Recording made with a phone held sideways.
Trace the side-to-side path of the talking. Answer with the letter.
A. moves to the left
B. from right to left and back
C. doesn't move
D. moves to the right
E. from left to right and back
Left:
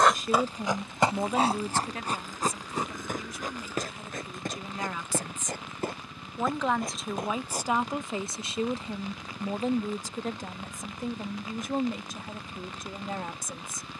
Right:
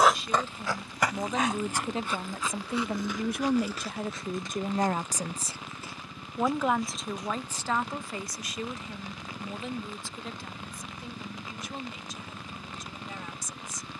E.